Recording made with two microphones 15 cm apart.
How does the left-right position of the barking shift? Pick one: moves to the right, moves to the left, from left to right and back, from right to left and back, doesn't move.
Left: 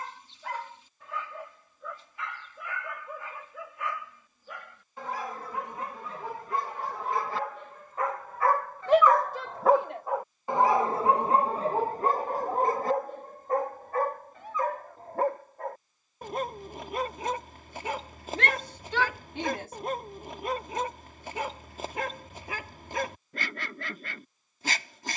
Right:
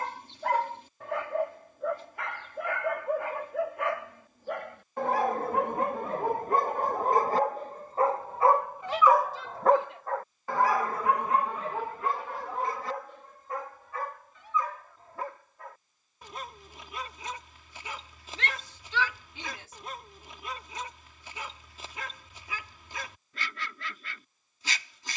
moves to the left.